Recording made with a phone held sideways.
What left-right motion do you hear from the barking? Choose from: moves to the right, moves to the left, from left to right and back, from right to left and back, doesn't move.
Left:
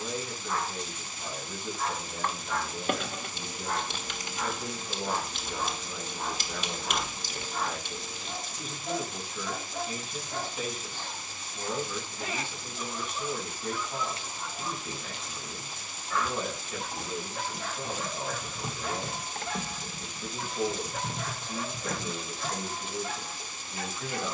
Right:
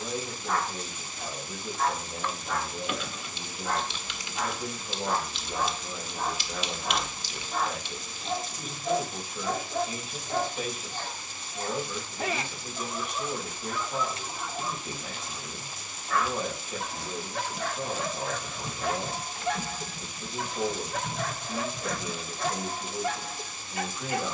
doesn't move.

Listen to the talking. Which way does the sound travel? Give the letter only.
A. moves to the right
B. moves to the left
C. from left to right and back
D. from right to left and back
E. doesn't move
E.